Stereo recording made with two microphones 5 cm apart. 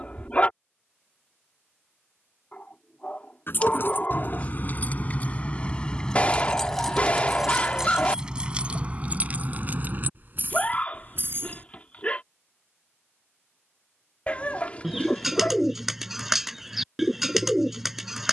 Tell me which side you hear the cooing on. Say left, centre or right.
centre.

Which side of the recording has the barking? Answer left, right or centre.
left.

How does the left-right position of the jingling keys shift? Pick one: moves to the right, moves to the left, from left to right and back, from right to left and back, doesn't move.
moves to the right.